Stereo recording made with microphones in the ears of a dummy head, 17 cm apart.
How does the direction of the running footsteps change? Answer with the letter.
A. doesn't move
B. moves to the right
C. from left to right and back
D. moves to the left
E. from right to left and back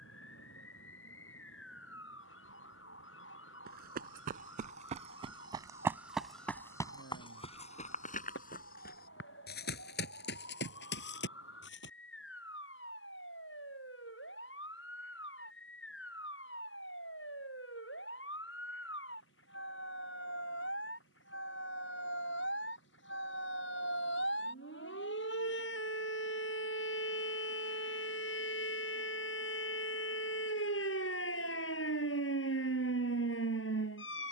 D.